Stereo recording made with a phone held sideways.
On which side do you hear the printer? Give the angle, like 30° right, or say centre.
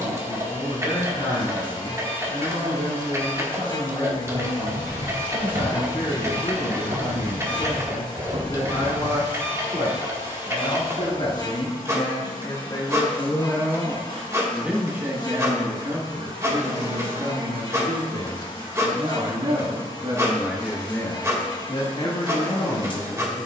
20° right.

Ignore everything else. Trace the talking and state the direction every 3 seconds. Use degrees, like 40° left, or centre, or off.
60° left, 60° left, 60° left, 50° left, 10° left, 40° right, 40° right, 50° left.